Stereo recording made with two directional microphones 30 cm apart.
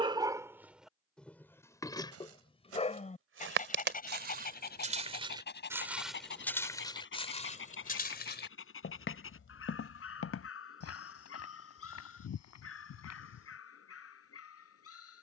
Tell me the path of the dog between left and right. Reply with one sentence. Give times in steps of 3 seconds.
In this clip you hear the dog in the centre from 0 s and on the left from 3 s.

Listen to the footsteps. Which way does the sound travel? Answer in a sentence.
You can hear the footsteps travel towards the left.